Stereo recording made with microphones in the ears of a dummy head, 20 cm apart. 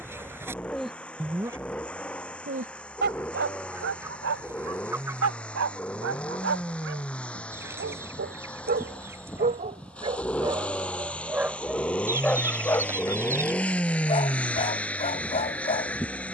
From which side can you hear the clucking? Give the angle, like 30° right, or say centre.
10° right.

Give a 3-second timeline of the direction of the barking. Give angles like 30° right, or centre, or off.
10° right, 60° right, 50° right, 20° right, 20° left, 30° left.